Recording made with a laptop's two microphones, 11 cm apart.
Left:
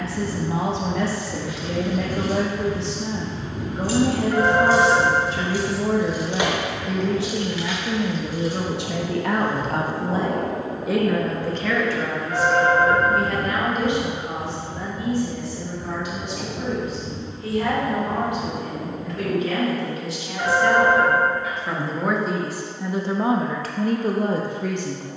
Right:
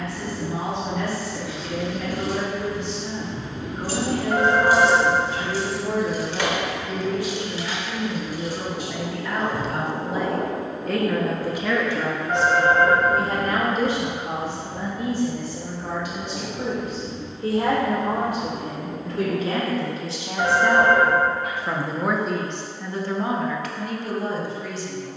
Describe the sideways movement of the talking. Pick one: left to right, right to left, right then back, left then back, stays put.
right then back.